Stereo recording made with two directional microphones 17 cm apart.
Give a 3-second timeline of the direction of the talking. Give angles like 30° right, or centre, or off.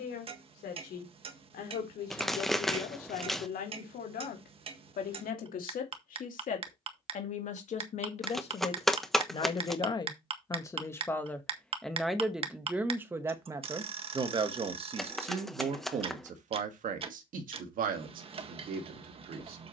60° left, 60° left, 40° left, 20° left, 20° right, 50° right, 60° right.